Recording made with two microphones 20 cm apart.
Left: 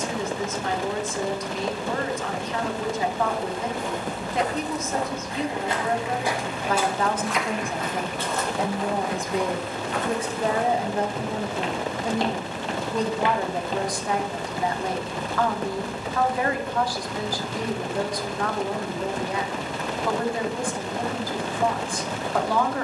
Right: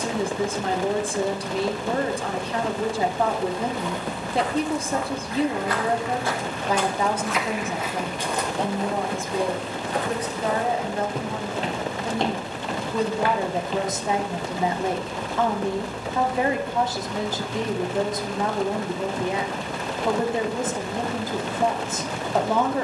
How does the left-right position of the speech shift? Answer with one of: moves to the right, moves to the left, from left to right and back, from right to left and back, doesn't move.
from right to left and back.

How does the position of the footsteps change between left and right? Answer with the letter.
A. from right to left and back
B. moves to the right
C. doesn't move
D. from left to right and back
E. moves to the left
D.